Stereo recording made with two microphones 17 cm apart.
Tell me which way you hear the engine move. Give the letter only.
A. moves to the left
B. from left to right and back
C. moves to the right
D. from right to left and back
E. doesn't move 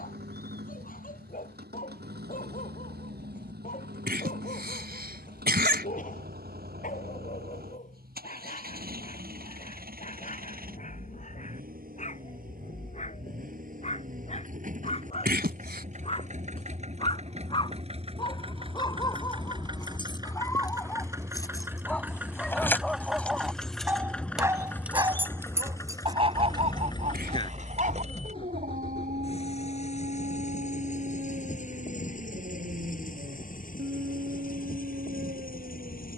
A.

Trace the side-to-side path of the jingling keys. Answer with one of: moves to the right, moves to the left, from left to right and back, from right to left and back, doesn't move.
moves to the right.